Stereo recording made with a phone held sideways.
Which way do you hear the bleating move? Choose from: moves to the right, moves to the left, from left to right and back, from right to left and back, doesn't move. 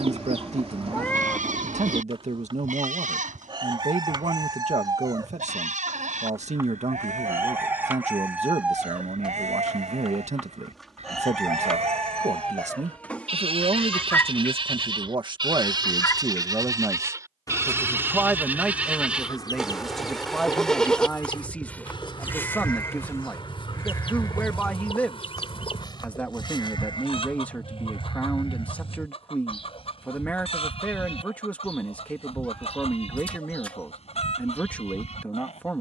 moves to the left.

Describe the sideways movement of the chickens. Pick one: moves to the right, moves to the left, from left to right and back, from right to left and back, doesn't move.
moves to the left.